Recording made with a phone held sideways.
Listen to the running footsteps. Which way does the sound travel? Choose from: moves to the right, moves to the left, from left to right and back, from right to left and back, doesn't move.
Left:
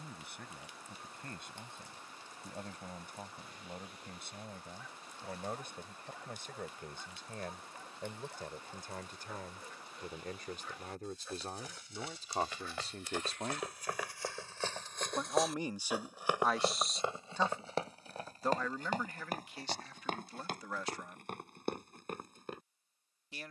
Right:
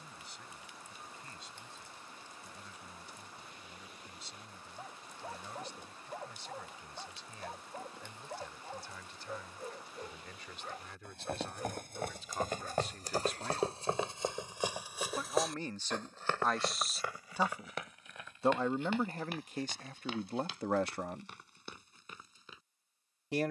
moves to the left.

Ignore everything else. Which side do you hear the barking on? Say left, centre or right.
right.